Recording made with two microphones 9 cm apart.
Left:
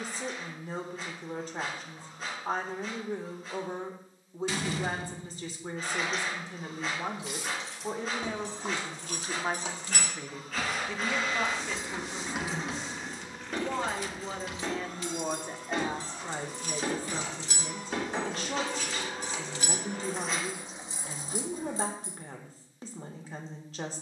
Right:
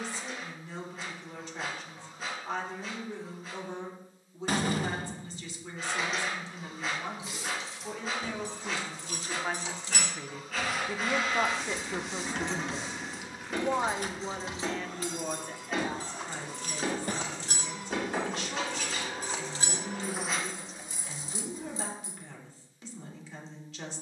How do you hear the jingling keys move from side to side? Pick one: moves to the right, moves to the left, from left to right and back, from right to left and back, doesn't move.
from left to right and back.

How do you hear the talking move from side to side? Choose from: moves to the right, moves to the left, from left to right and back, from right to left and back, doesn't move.
from left to right and back.